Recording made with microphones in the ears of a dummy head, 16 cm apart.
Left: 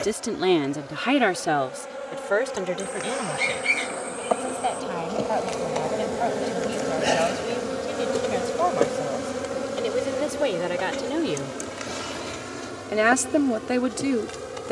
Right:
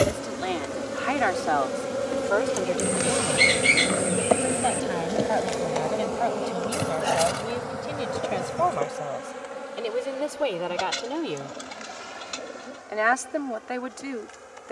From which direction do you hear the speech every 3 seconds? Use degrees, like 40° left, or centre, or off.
40° left, centre, centre, 10° left, 40° left.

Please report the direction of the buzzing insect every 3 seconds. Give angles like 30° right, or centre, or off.
60° right, 20° right, 30° left, 60° left, 70° left.